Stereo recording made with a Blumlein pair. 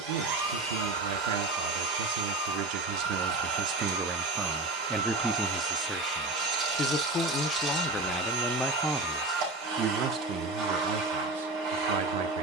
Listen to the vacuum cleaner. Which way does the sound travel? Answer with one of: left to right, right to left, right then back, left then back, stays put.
stays put.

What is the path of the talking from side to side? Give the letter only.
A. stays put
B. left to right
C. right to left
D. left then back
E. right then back
D.